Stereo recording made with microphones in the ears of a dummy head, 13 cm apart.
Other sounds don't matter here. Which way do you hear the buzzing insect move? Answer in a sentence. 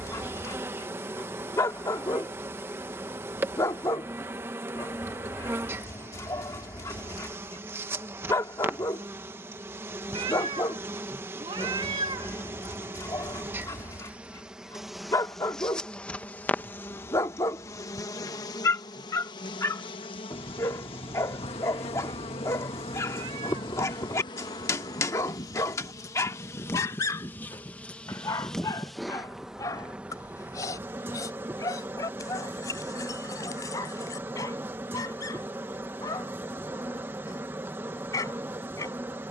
You can hear the buzzing insect move from right to left and back again.